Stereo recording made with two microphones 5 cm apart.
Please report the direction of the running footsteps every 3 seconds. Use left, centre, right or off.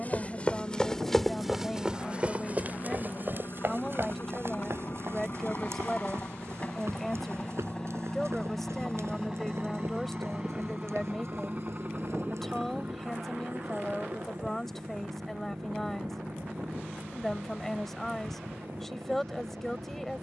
centre, right, right, right, right, off, off.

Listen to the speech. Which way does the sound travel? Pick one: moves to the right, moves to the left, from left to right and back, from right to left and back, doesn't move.
doesn't move.